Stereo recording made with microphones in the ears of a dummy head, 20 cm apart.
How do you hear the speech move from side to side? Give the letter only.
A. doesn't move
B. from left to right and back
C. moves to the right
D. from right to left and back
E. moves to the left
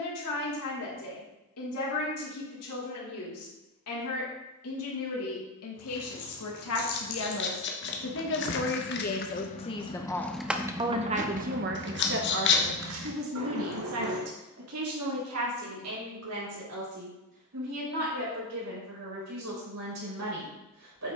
C.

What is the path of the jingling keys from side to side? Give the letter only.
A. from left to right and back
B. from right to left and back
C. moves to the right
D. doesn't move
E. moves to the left
C.